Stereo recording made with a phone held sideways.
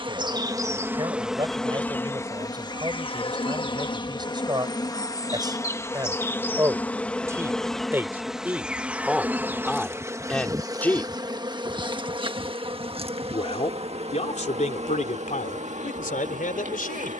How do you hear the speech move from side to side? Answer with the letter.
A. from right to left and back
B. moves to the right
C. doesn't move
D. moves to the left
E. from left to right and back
D.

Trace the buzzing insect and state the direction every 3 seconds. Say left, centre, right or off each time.
centre, left, centre, right, right, right.